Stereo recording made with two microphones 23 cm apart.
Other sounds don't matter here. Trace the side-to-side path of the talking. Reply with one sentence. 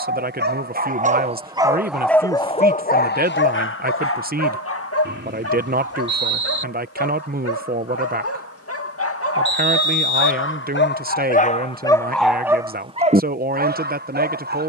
In this clip you hear the talking stay put.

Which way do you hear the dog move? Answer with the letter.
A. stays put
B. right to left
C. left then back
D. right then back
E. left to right
C.